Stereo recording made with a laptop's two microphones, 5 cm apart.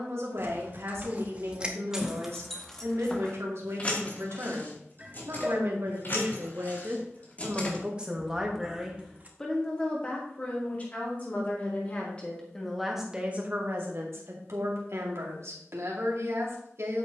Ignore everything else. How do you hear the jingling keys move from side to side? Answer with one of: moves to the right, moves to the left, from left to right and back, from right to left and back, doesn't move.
from right to left and back.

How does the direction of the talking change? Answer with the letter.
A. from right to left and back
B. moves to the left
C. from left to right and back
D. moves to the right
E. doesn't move
A.